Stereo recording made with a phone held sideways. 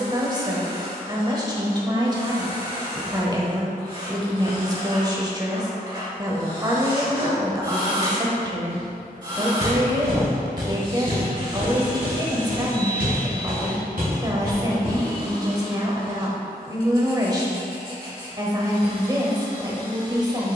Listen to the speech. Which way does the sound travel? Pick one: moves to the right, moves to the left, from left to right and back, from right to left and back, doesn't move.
doesn't move.